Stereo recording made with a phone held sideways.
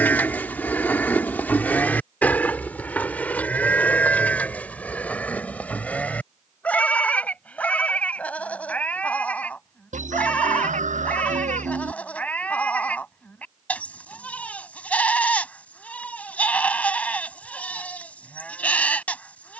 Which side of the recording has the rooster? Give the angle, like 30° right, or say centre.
70° right.